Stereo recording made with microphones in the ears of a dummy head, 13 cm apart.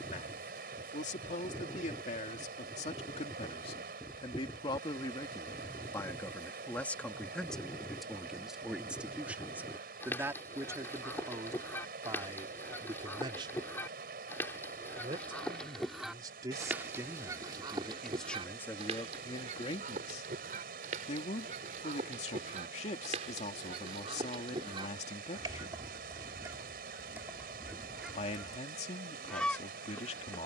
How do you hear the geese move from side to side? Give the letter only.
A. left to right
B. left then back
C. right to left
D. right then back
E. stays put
D.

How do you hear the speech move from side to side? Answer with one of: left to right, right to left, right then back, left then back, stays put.
right then back.